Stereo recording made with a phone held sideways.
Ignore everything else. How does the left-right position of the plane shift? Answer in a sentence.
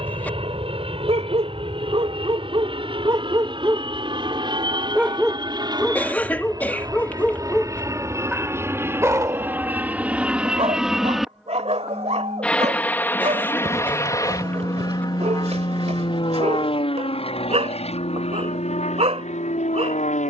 In this clip you hear the plane go from the right side to the left.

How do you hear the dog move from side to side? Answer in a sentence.
In this clip you hear the dog move from right to left and back again.